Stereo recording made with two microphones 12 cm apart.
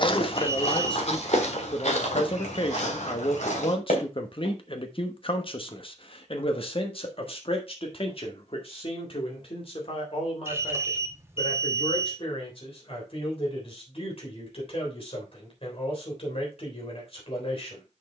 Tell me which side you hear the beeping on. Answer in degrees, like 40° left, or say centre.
20° right.